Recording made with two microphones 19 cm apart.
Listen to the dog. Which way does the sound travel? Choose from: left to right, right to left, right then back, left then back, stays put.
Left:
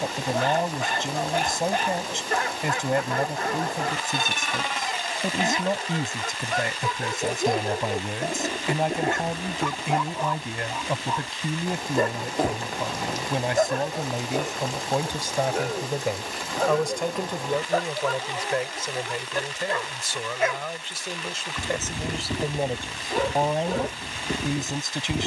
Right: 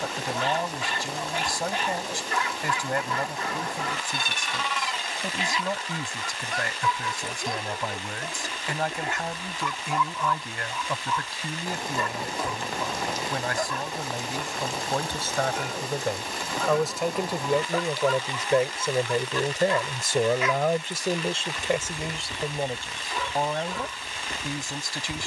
stays put.